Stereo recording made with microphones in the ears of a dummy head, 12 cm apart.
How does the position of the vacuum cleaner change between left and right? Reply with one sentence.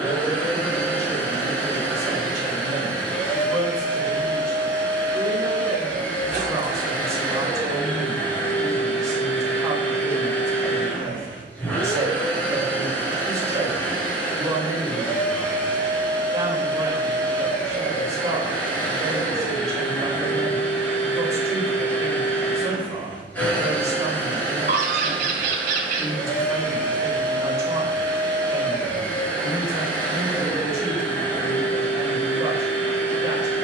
You can hear the vacuum cleaner stay put.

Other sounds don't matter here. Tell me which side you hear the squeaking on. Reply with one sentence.
You can hear the squeaking on the right.